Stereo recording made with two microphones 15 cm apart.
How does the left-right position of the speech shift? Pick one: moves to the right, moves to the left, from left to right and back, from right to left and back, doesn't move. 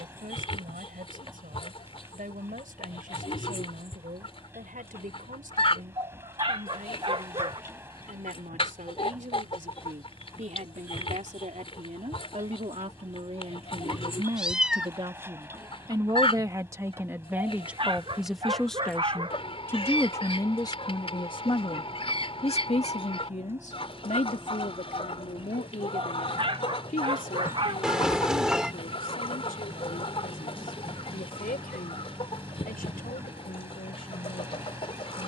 moves to the left.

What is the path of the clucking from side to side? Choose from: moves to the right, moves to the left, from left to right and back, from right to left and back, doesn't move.
doesn't move.